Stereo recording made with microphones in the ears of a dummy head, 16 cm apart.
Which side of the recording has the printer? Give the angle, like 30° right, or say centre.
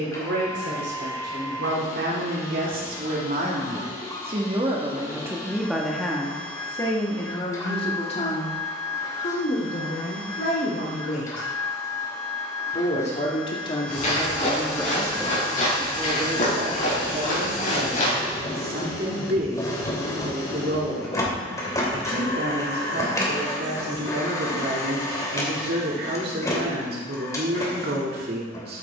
20° left.